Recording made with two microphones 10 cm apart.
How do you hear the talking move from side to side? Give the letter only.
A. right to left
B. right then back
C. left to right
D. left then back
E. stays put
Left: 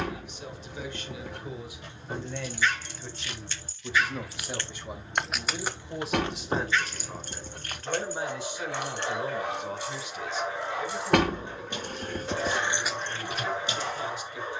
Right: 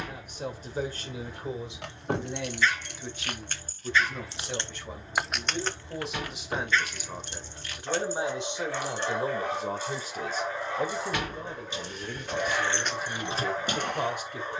D.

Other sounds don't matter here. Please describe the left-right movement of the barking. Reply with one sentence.
You can hear the barking stay in one place.